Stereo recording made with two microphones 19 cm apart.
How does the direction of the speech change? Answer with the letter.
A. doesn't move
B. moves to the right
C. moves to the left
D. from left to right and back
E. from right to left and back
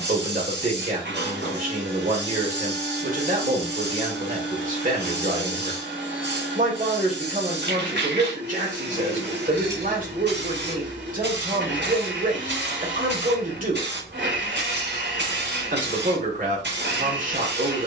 A.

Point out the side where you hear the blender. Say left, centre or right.
right.